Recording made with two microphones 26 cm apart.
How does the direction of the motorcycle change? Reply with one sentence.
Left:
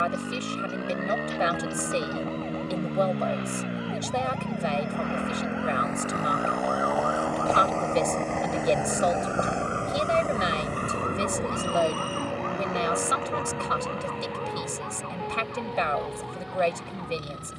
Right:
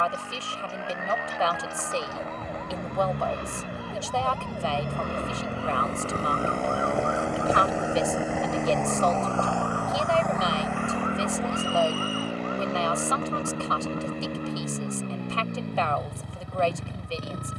In this clip you hear the motorcycle move to the right.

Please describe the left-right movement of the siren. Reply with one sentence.
You can hear the siren travel towards the left.